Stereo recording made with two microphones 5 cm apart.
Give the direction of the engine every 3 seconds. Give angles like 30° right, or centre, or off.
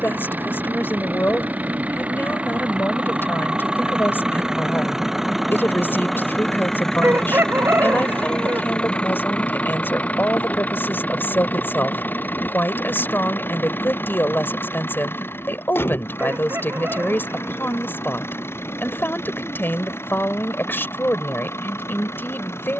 40° right, 10° right, 10° left, 40° left, 50° left, 60° left, 60° left, 70° left.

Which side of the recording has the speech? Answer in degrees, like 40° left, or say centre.
50° left.